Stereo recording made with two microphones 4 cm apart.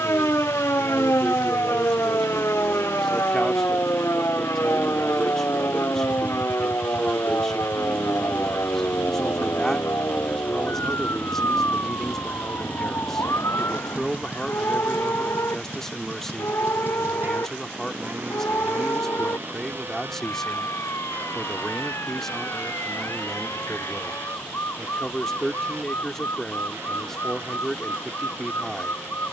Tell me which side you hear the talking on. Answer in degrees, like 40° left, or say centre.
10° left.